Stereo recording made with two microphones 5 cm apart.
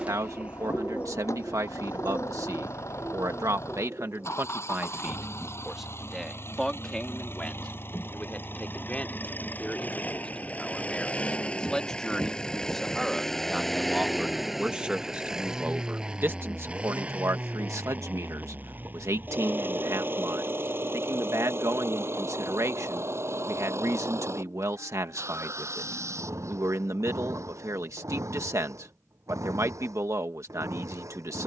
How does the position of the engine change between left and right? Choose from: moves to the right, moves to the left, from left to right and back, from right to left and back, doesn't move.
moves to the right.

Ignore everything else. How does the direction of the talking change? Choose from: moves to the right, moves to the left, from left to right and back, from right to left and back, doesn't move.
from right to left and back.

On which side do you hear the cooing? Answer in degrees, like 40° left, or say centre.
20° right.